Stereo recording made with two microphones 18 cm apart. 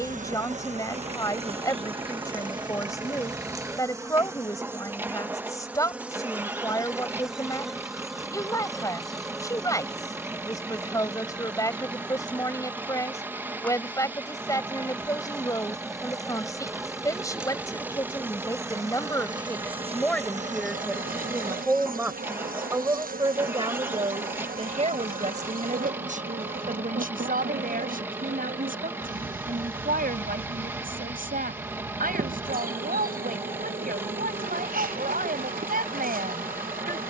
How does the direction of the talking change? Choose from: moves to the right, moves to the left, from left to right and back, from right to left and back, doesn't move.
moves to the right.